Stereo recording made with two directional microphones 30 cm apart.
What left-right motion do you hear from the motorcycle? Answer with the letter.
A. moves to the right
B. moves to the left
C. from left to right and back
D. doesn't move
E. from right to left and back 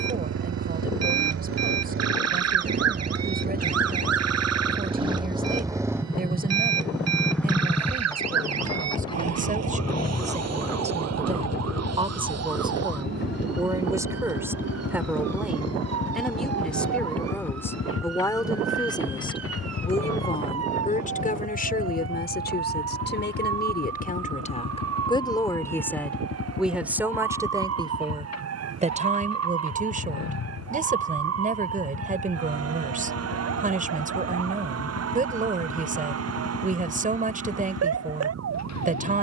B.